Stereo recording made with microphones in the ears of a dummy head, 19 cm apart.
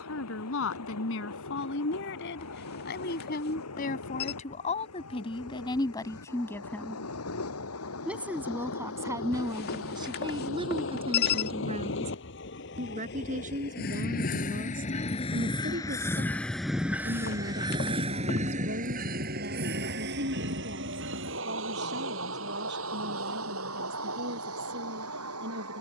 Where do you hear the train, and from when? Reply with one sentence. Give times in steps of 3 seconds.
In this clip you hear the train on the left from 0 s, in the centre from 15 s and on the right from 18 s.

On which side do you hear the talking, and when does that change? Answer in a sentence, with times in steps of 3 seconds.
You can hear the talking on the left from 0 s, in the centre from 6 s and on the right from 9 s.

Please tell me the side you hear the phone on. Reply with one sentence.
You can hear the phone on the left.